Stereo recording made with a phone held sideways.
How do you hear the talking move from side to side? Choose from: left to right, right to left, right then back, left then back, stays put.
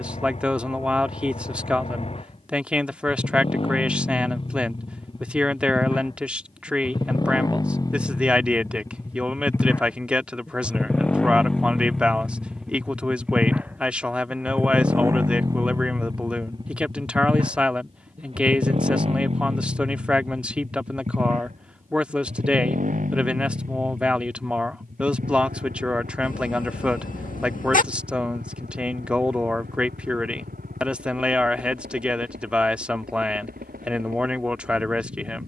stays put.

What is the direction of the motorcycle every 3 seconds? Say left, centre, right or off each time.
left, left, left, centre, centre, right, right, right, right, right, right, right.